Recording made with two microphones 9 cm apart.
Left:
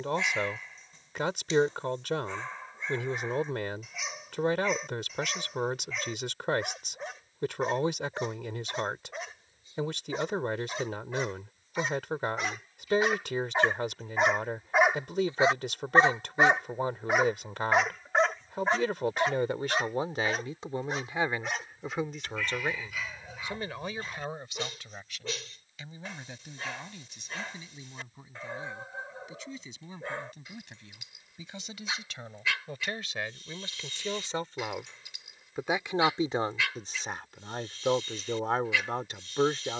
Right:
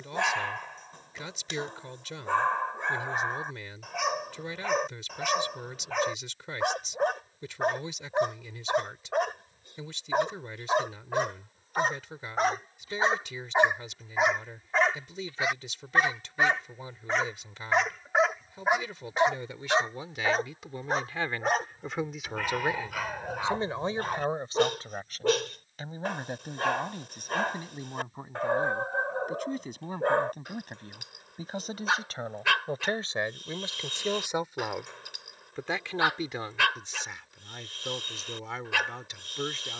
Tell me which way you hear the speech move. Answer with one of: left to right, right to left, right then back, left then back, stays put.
right then back.